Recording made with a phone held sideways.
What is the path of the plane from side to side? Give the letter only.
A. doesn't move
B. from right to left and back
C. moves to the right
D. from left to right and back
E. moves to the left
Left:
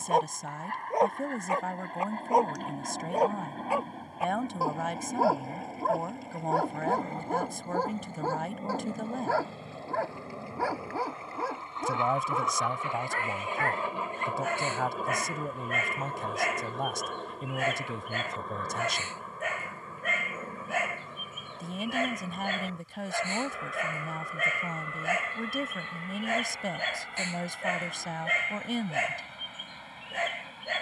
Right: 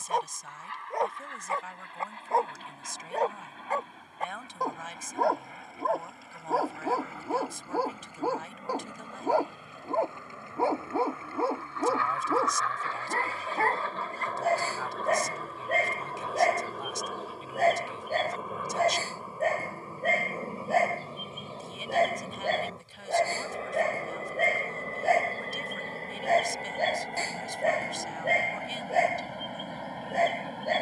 C.